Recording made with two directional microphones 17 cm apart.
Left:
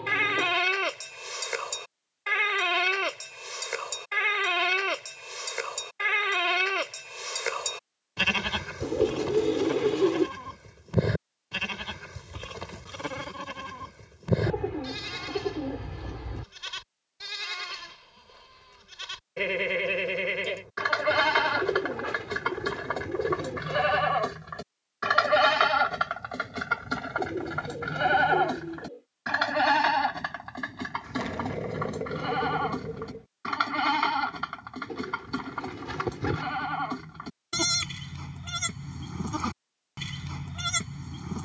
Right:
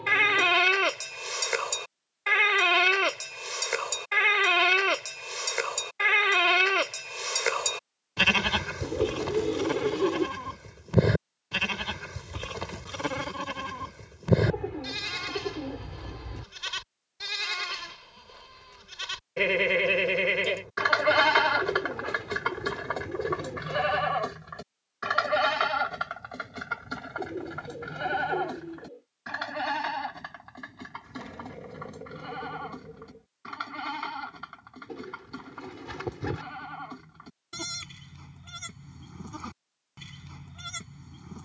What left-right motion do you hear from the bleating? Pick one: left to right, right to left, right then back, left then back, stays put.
right to left.